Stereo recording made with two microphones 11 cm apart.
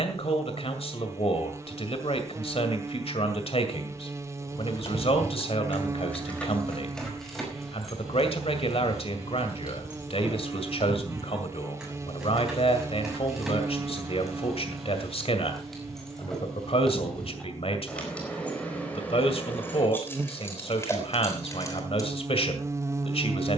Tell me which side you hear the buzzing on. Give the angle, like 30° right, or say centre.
30° right.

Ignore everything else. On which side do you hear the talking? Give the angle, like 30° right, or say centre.
60° left.